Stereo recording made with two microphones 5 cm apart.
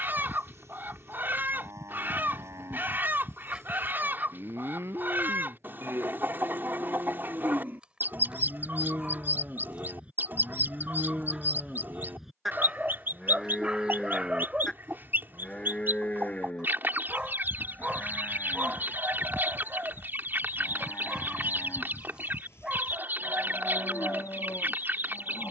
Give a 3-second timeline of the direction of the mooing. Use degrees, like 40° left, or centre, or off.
60° right, 50° right, 40° right, 20° right, centre, 20° left, 40° left, 50° left, 50° left.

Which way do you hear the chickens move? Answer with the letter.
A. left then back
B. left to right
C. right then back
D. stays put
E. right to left
D.